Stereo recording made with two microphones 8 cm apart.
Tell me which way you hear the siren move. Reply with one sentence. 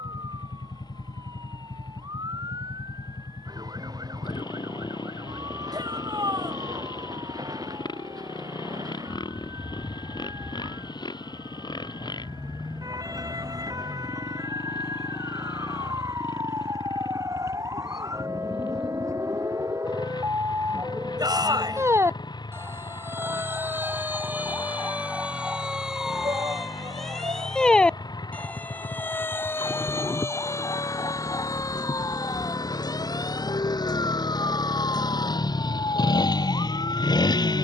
You can hear the siren go from the right side to the left.